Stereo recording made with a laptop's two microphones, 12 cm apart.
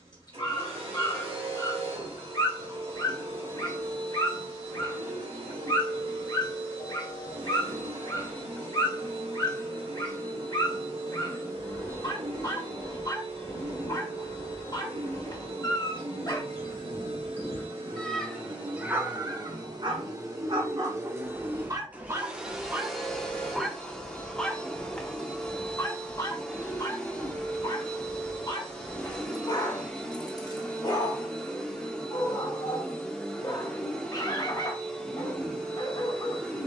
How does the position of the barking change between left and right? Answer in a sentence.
In this clip you hear the barking move from left to right and back again.